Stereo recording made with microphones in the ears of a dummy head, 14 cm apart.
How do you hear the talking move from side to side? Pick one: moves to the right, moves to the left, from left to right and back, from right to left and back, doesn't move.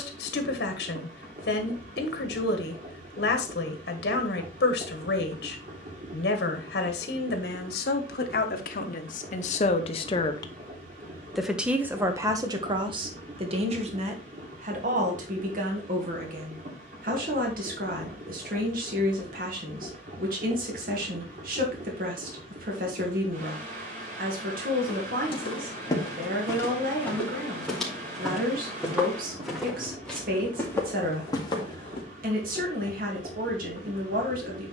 moves to the right.